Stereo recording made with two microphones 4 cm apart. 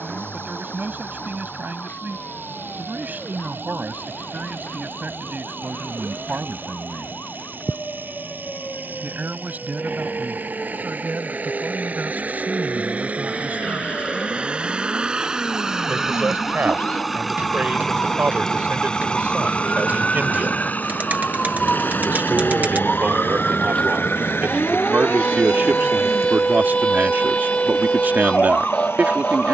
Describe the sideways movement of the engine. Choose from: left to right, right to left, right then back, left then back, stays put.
right to left.